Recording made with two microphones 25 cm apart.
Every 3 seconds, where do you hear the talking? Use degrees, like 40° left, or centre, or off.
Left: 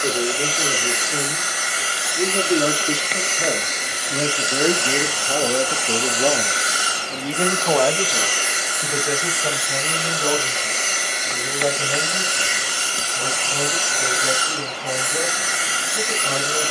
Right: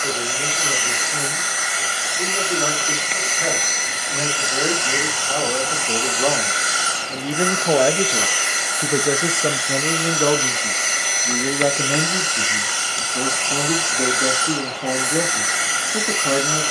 40° left, 30° left, 10° right, 60° right, 80° right, 80° right.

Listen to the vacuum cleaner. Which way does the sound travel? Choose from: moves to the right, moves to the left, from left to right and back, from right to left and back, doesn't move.
doesn't move.